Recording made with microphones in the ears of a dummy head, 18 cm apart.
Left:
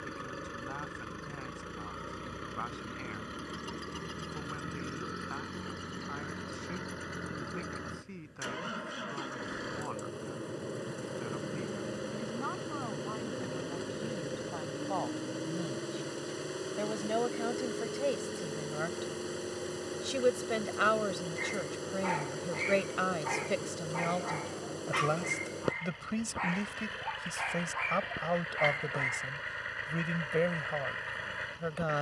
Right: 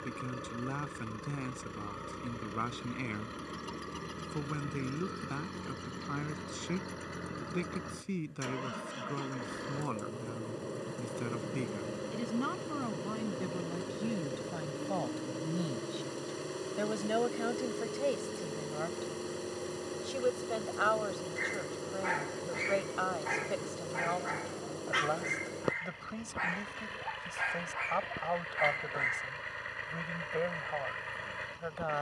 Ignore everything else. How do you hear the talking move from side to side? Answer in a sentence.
In this clip you hear the talking travel towards the left.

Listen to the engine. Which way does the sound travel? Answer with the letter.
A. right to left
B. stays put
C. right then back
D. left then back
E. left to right
B.